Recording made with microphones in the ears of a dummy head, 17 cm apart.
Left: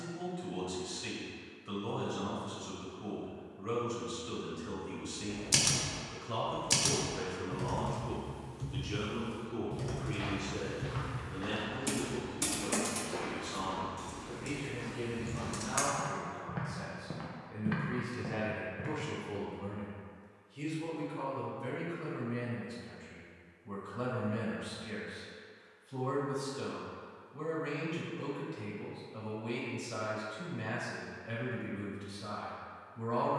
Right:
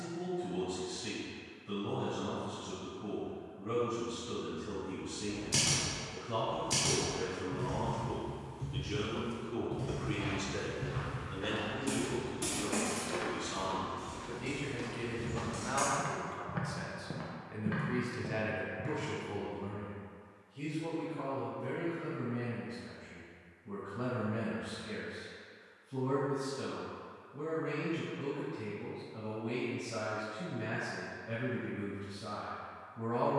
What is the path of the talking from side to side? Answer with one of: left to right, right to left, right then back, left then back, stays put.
right then back.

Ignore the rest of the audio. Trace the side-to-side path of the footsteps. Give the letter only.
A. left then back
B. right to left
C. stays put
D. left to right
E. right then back
E.